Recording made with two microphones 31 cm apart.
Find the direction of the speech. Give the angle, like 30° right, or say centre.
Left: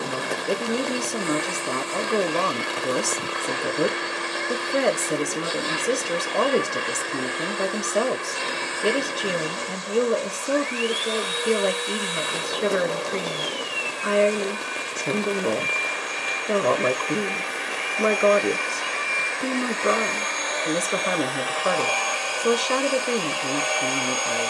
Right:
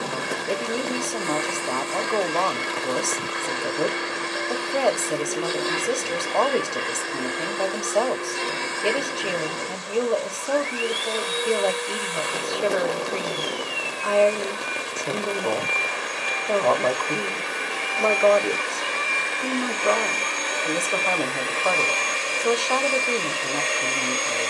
20° left.